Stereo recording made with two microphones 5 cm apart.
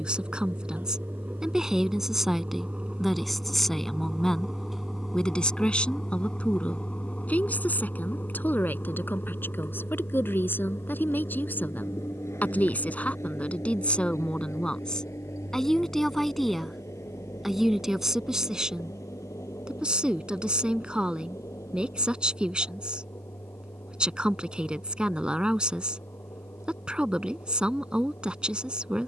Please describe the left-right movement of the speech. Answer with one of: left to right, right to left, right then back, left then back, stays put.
left then back.